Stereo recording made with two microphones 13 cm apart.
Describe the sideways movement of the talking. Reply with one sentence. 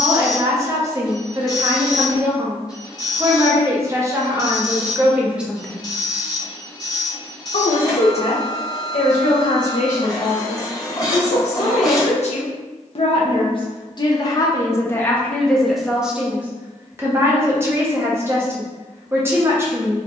In this clip you hear the talking go left and come back.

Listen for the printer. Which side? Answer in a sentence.
You can hear the printer on the left.